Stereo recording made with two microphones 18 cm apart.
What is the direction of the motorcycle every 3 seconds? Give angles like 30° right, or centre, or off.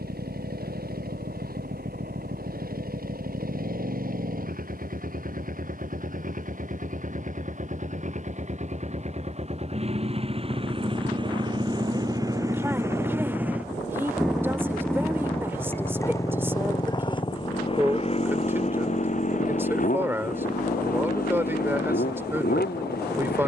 60° right, 60° right, 50° right, 30° right, 10° right, 20° left, 40° left, 60° left.